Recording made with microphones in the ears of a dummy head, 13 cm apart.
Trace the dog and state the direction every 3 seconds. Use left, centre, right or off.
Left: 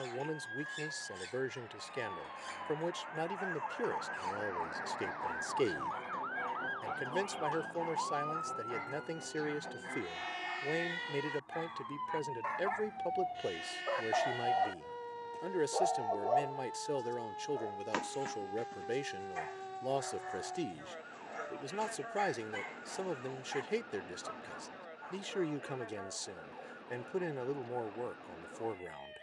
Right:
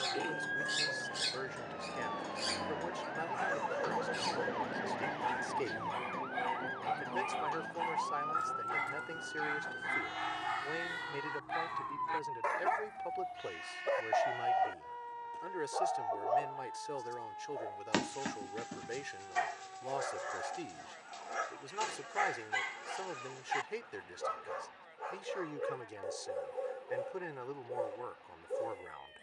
right, right, right, right, right, centre, right, right, right, right.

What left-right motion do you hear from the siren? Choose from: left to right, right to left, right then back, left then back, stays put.
right to left.